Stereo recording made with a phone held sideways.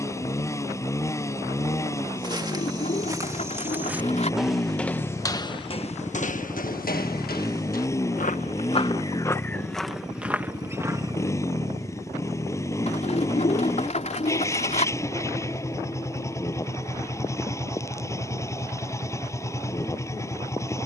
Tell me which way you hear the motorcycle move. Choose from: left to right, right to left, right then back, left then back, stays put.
stays put.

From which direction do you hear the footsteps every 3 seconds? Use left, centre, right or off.
right, centre, left, centre, off, off, off.